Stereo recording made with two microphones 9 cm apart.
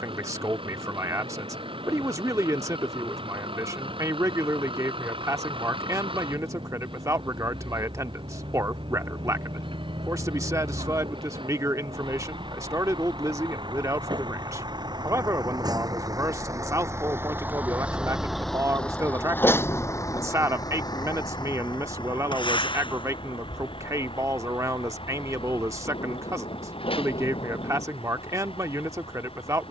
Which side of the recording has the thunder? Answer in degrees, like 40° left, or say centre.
70° left.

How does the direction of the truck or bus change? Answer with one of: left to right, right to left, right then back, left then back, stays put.
right to left.